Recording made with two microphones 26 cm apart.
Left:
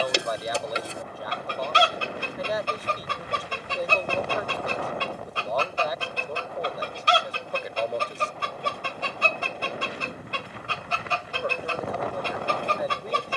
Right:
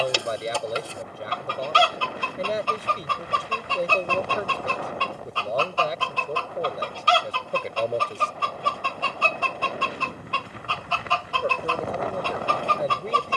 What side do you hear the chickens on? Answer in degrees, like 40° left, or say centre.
20° left.